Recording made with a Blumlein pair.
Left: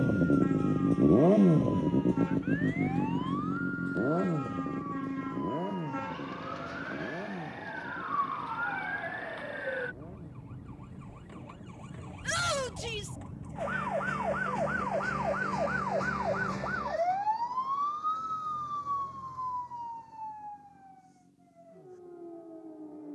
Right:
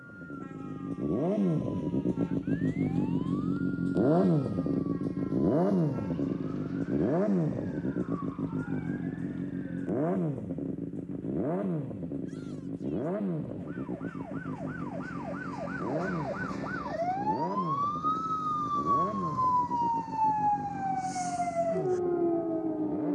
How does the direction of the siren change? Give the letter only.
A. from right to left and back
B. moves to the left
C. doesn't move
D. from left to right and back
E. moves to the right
E.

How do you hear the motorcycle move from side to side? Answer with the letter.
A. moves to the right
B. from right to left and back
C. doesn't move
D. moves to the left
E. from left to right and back
A.